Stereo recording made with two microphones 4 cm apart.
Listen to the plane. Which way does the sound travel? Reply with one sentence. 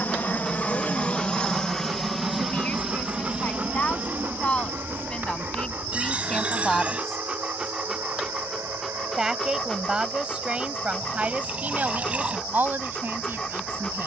You can hear the plane move to the right.